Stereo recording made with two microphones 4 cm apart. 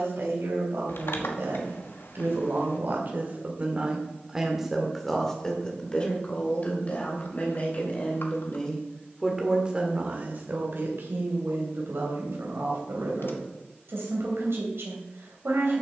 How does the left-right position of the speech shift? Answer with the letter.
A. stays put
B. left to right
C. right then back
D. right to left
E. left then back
E.